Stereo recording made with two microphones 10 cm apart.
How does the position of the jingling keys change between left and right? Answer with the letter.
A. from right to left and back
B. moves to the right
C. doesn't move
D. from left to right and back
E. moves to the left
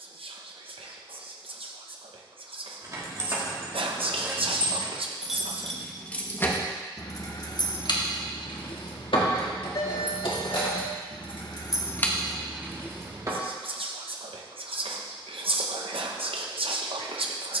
A.